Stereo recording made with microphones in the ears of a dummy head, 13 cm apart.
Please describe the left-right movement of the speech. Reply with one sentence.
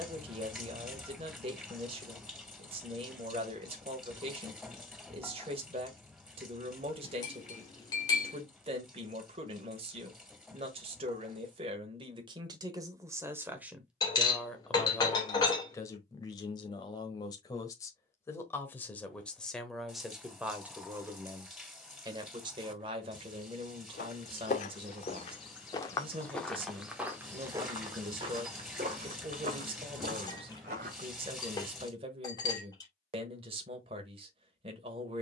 You can hear the speech go left and come back.